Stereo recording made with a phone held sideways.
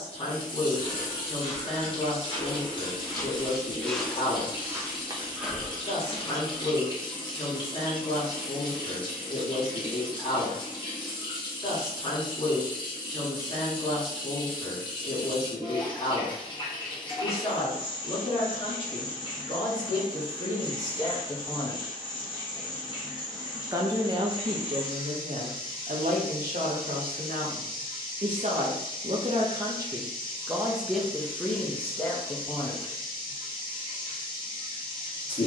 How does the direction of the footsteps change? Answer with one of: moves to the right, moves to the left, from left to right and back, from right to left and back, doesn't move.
from left to right and back.